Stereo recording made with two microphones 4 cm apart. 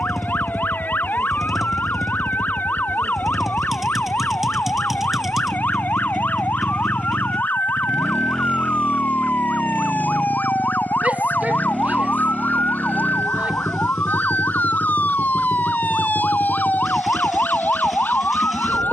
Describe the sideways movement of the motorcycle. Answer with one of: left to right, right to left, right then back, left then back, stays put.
stays put.